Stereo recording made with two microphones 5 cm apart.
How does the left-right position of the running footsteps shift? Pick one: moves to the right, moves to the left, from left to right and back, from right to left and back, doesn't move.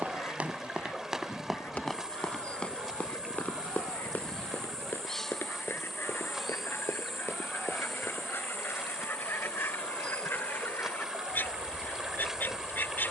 moves to the left.